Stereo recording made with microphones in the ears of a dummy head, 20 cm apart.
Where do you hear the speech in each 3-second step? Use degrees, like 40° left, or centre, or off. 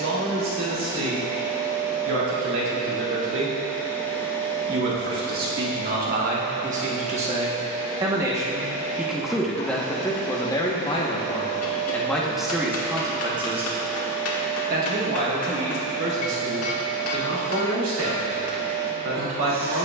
60° right, 50° right, 30° right, 10° left, 20° right, 50° right, 60° right.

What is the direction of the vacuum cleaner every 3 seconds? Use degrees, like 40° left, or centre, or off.
20° right, 10° left, 40° left, 30° left, 20° left, 10° right, 20° right.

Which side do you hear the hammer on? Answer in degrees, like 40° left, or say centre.
70° left.